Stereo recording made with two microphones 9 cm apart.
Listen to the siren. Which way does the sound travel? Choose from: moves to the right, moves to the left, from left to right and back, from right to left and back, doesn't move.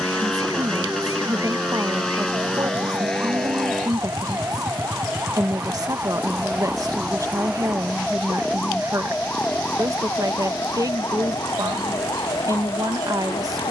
moves to the left.